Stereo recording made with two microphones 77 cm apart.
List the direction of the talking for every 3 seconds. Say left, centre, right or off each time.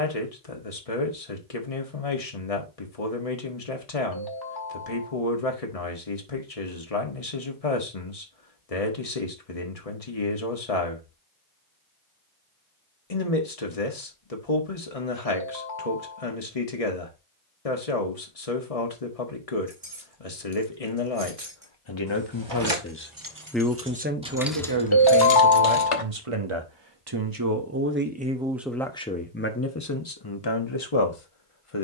left, left, left, left, left, left, left, left, right, centre, left.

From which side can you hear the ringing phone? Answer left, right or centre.
left.